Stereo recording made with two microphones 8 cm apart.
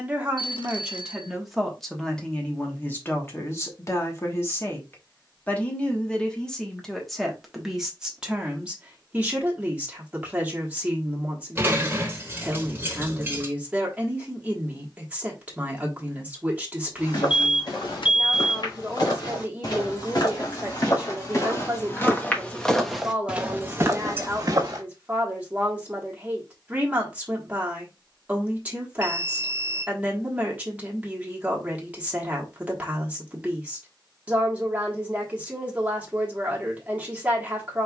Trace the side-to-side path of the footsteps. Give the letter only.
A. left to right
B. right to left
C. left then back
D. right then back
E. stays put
A.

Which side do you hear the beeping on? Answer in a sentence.
You can hear the beeping on the left.